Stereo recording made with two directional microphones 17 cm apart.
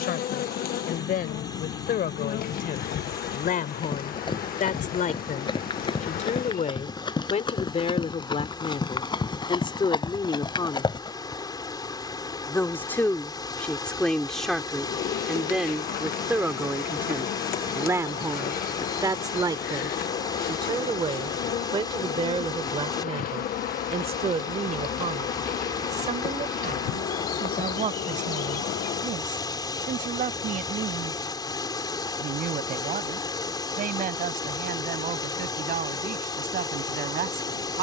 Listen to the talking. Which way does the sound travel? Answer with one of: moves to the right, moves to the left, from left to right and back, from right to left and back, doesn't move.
moves to the right.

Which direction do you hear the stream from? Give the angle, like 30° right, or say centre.
20° left.